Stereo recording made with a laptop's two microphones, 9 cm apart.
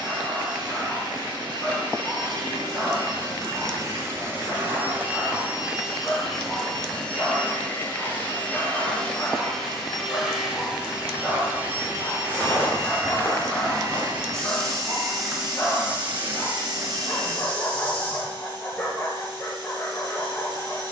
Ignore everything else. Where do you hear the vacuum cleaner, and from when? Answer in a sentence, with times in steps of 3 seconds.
You can hear the vacuum cleaner on the right from 0 s, in the centre from 6 s and on the right from 12 s.